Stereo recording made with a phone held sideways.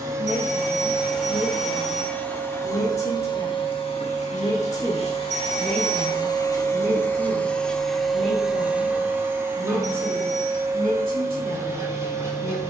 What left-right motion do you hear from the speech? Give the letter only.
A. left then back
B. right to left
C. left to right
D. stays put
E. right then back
C.